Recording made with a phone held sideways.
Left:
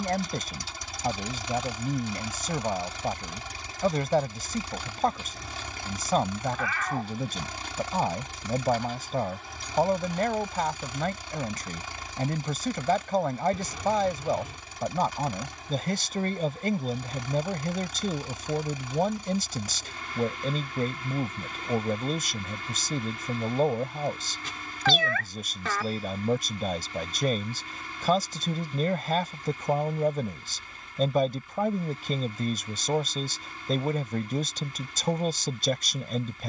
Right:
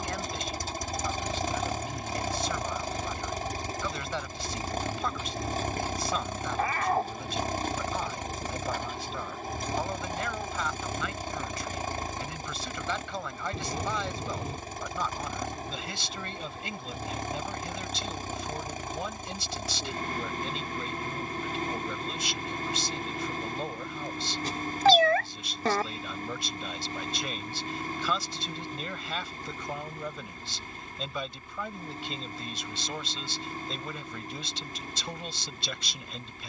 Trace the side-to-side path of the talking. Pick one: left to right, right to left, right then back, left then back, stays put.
stays put.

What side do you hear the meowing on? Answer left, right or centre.
right.